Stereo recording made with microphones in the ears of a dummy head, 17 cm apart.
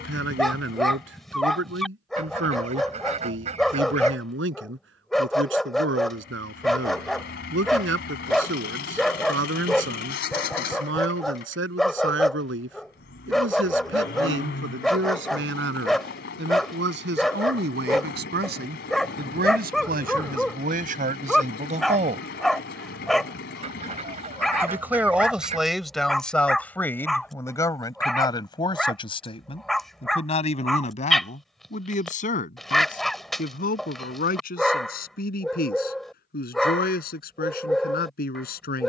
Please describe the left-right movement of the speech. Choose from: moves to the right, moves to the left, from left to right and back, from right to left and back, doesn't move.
moves to the left.